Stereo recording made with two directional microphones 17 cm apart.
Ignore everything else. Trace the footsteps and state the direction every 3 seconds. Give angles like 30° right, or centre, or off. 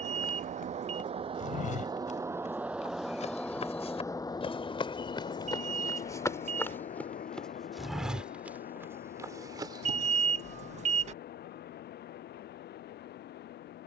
50° left, 30° left, 10° left, 20° right, off.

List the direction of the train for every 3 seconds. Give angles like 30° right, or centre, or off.
30° right, 20° left, 50° left, 60° left, 70° left.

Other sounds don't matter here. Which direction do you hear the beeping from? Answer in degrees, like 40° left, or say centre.
40° right.